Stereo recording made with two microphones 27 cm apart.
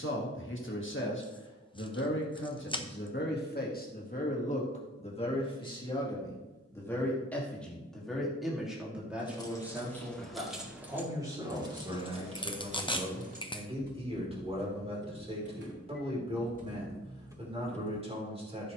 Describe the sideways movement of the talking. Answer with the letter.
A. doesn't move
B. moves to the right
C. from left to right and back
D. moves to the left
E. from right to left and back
B.